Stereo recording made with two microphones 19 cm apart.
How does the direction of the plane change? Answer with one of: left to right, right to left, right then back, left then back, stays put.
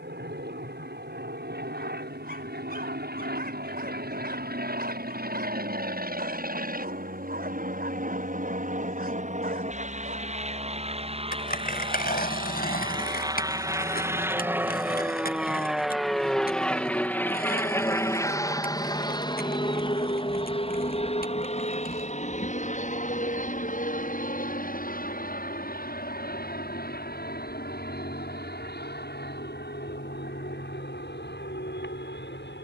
right to left.